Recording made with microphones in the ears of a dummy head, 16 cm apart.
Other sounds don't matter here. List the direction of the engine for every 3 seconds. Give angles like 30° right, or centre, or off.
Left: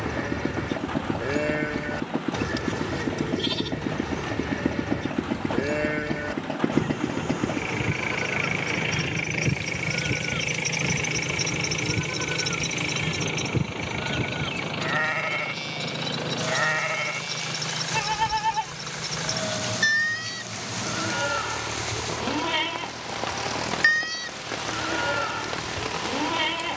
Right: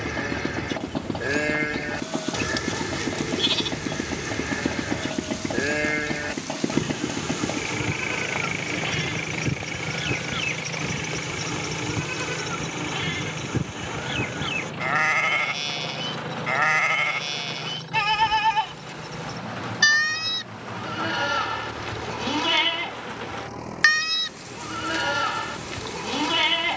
50° right, 30° right, 10° right, 10° left, 30° left, 50° left, 50° left, 60° left, 60° left.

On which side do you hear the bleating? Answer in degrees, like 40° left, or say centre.
40° right.